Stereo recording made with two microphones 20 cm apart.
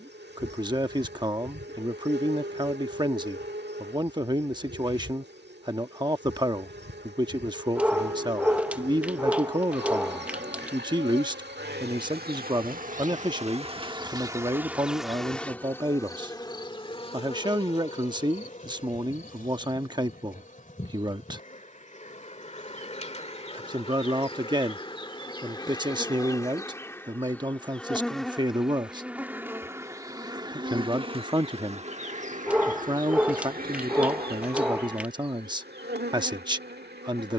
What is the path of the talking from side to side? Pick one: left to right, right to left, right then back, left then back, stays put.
stays put.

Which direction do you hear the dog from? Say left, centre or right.
centre.